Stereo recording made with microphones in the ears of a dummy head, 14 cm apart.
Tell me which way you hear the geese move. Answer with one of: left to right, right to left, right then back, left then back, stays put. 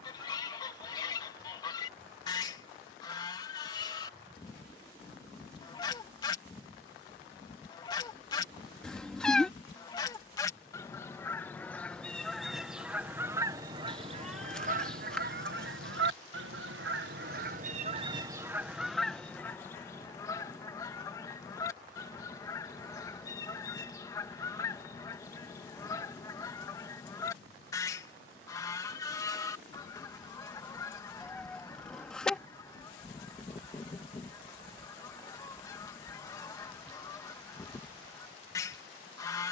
right then back.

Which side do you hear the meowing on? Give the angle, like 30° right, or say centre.
centre.